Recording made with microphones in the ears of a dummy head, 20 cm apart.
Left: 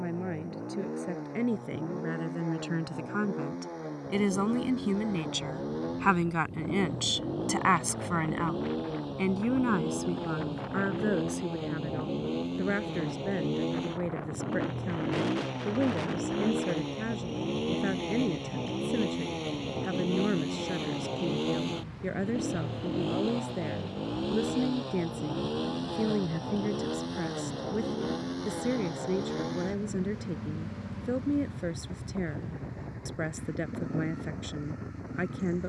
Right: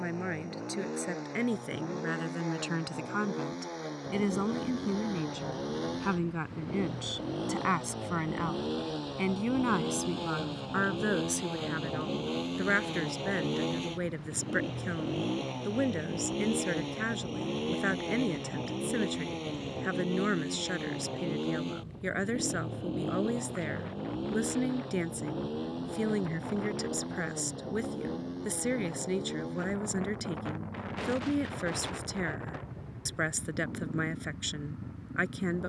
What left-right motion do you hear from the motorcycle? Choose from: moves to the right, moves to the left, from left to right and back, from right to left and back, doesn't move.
moves to the left.